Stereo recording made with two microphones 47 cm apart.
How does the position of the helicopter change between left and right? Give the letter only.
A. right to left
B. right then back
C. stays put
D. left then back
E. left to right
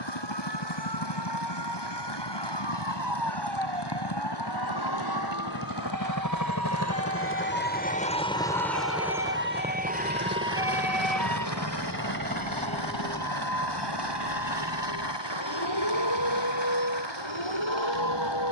E.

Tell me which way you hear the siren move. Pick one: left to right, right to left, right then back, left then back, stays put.
right to left.